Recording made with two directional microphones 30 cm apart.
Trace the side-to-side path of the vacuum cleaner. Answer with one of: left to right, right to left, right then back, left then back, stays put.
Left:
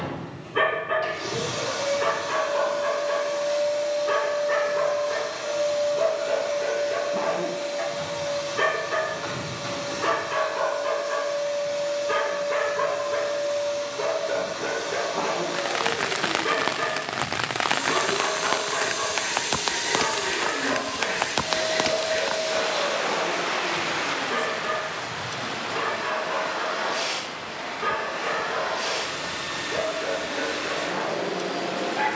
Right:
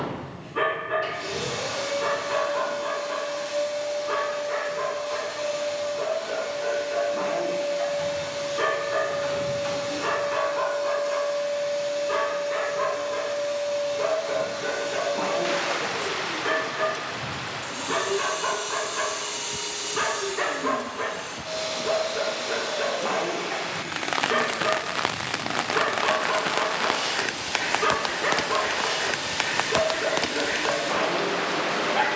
stays put.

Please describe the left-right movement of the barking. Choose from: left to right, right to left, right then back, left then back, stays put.
left to right.